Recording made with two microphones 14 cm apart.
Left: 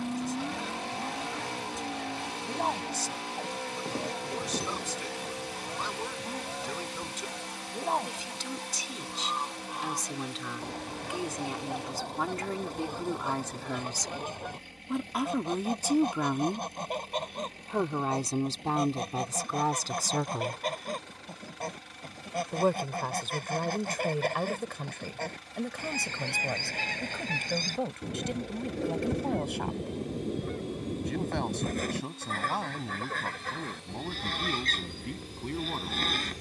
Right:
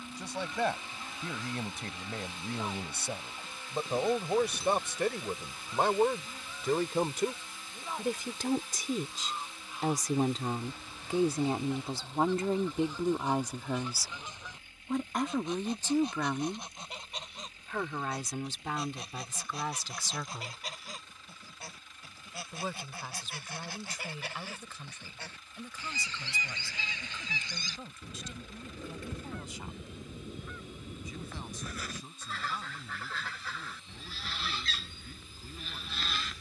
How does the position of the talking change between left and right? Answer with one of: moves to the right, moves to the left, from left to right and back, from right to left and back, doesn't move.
moves to the left.